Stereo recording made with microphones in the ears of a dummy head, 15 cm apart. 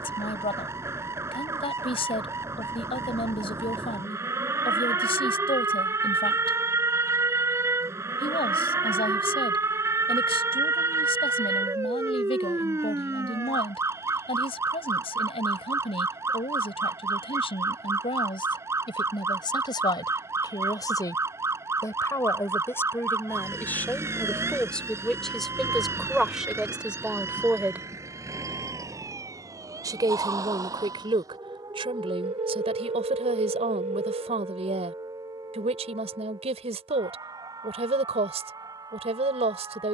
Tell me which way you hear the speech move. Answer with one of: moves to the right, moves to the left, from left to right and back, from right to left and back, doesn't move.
moves to the right.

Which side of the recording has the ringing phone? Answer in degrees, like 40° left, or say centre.
40° right.